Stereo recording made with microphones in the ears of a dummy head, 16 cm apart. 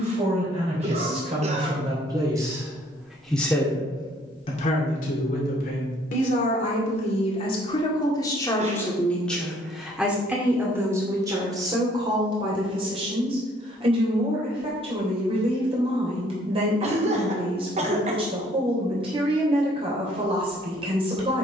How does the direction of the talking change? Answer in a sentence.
You can hear the talking go left and come back.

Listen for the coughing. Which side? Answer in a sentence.
In this clip you hear the coughing on the right.